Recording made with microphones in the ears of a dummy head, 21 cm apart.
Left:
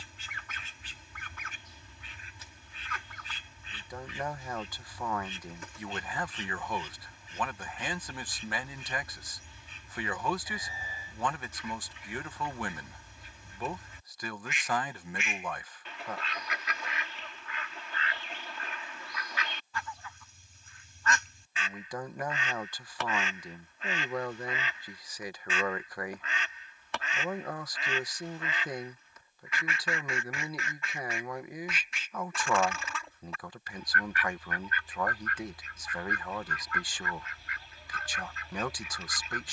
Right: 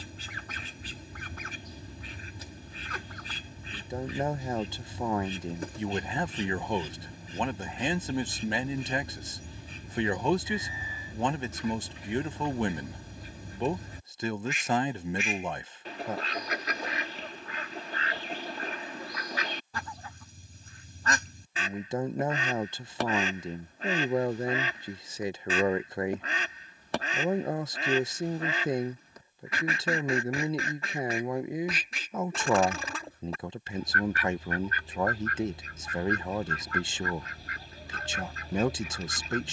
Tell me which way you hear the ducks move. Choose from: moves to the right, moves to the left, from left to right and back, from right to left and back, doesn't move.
doesn't move.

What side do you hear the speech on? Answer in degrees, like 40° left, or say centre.
20° right.